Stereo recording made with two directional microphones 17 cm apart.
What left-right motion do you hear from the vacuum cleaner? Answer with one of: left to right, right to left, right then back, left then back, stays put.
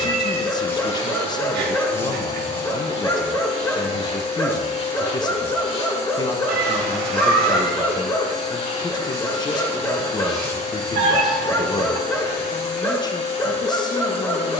stays put.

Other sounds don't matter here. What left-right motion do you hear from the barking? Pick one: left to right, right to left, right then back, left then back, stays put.
stays put.